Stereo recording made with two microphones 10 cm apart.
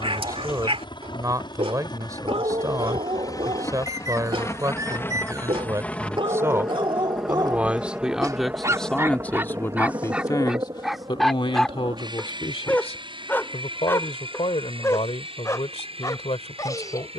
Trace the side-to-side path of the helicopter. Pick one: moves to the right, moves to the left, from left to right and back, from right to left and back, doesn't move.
moves to the right.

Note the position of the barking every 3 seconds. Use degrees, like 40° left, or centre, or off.
60° right, 60° right, 50° right, 10° right, 20° left, 30° left.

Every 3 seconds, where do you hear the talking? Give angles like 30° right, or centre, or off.
30° right, 30° right, 10° right, 40° left, 70° left, 80° left.